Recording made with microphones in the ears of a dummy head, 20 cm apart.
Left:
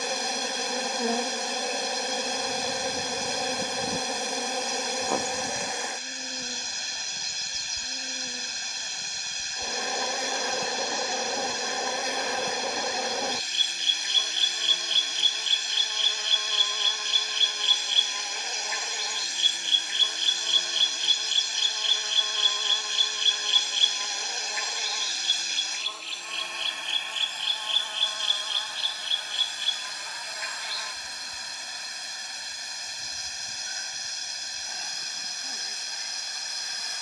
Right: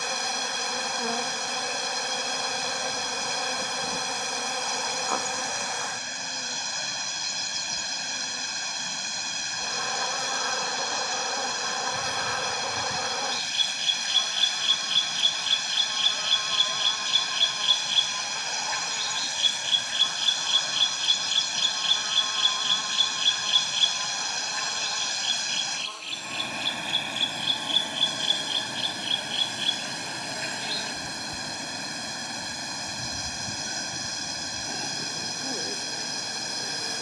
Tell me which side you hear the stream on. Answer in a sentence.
In this clip you hear the stream on the right.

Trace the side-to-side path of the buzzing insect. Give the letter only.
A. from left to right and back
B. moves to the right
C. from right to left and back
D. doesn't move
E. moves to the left
B.